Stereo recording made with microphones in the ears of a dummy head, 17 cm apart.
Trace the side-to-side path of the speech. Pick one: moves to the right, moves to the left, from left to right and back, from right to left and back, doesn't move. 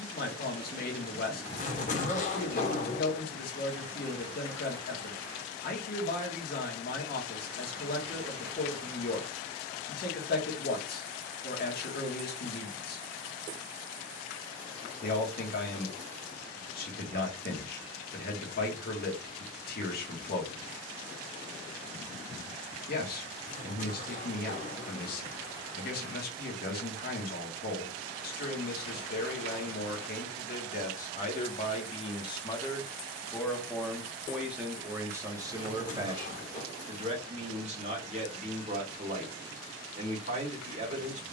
moves to the right.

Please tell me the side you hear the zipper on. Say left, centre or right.
left.